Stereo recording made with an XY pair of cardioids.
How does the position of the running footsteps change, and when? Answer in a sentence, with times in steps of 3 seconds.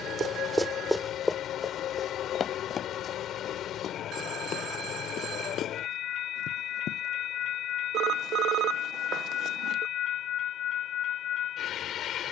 You can hear the running footsteps in the centre from 0 s, on the left from 3 s and not at all from 9 s.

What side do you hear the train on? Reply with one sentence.
You can hear the train on the left.